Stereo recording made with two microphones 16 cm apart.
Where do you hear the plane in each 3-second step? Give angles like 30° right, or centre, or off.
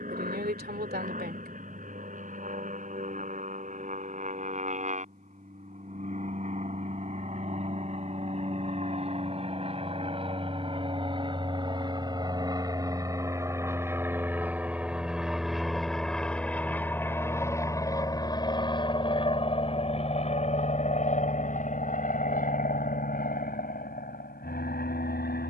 60° right, 50° right, 50° right, 40° right, 20° right, 10° left, 30° left, 50° left, 60° left.